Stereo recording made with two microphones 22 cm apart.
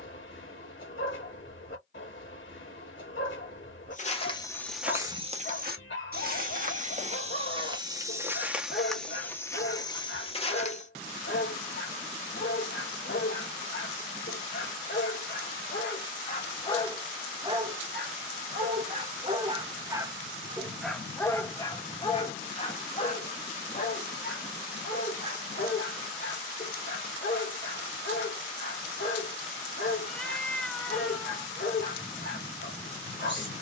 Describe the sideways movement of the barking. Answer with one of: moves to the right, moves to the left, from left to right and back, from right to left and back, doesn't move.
from left to right and back.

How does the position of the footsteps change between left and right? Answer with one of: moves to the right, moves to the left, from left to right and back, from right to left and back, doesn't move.
from left to right and back.